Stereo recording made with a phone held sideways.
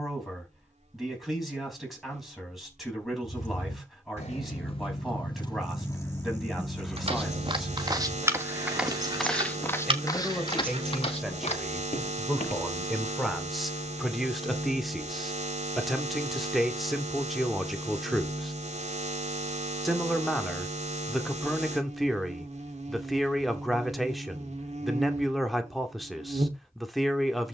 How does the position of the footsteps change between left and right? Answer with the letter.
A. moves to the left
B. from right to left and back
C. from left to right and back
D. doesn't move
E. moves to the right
A.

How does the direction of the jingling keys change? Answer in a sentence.
You can hear the jingling keys move from left to right.